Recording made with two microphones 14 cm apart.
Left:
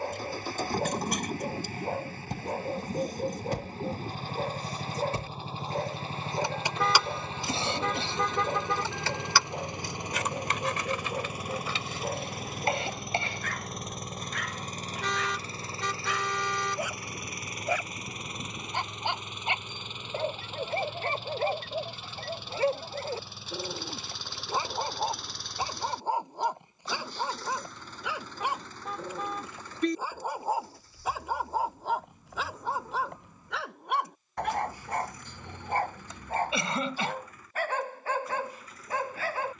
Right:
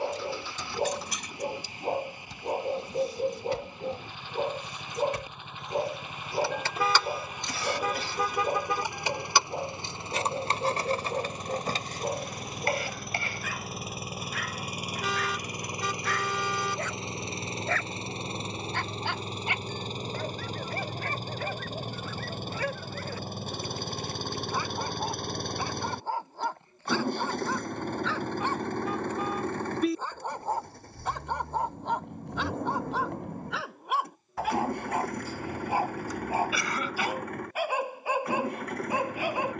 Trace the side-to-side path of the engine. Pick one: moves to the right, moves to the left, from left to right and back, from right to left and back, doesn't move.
moves to the right.